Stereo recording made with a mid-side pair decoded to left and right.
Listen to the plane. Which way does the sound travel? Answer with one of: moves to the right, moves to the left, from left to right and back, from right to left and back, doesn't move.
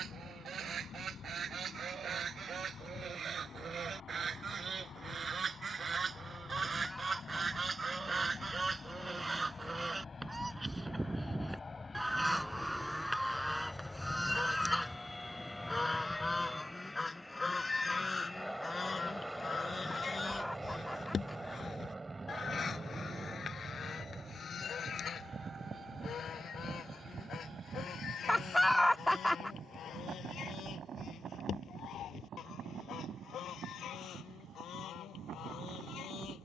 moves to the right.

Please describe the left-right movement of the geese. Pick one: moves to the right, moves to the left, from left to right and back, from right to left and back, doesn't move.
moves to the left.